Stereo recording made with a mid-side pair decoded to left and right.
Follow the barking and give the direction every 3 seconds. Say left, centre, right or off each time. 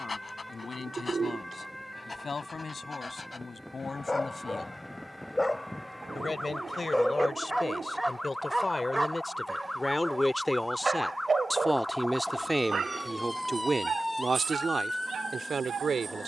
left, left, centre, right, right, right.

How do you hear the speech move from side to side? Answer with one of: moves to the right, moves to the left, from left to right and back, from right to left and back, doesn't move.
moves to the right.